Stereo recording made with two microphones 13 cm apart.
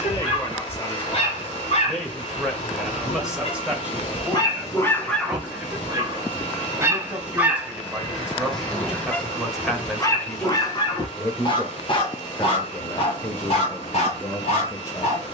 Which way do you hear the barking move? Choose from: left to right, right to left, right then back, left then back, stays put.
right then back.